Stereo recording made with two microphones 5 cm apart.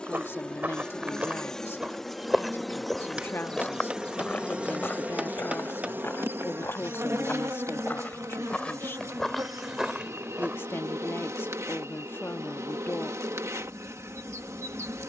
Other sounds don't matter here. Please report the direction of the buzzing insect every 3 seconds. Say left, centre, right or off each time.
centre, right, right, right, right.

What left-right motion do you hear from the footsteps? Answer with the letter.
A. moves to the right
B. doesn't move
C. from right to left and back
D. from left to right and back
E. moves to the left
C.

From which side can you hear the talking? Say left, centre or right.
left.